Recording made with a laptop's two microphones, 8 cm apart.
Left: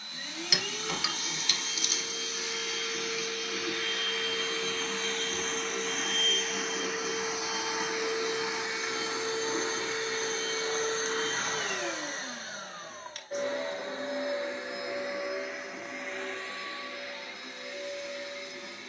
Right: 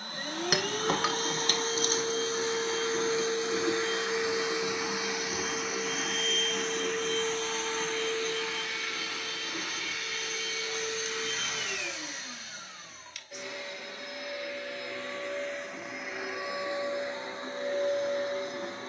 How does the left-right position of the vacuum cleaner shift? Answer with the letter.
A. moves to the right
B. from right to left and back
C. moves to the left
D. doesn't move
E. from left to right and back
B.